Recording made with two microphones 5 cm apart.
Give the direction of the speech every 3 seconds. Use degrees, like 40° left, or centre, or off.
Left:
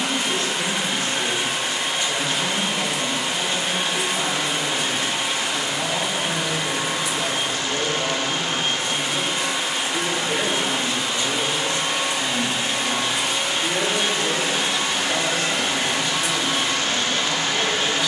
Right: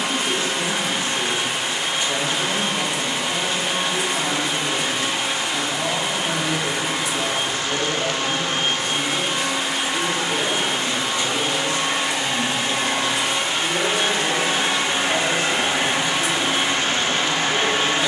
20° right, 20° right, 20° right, 30° left, 10° left, 20° right.